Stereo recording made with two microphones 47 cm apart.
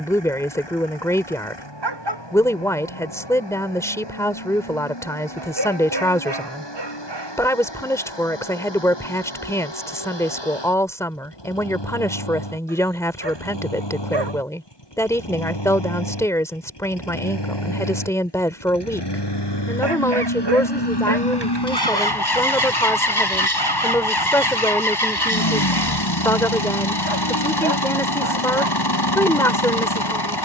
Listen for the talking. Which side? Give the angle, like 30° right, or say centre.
10° left.